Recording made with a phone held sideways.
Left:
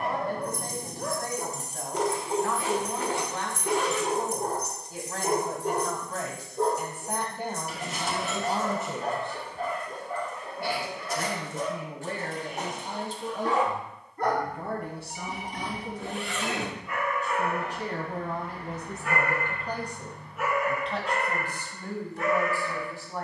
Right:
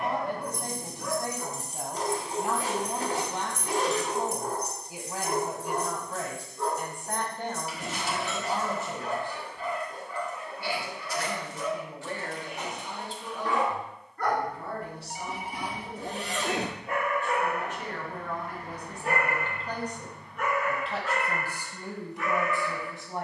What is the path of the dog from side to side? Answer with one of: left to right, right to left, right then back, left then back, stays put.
right then back.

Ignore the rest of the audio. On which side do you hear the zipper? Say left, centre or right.
right.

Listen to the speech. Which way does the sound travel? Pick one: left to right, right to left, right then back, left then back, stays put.
left then back.